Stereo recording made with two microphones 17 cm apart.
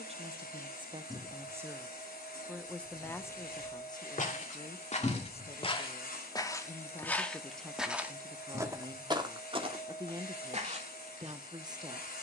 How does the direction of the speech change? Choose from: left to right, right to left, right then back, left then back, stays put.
left then back.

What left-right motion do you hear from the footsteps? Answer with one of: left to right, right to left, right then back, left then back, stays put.
left to right.